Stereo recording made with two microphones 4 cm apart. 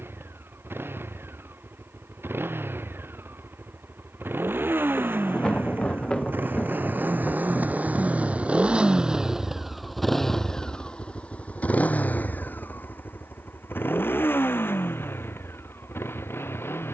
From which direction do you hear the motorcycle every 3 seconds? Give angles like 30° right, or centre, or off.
70° right, 70° right, 40° right, 10° left, 60° left, 70° left.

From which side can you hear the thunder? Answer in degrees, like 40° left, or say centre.
20° left.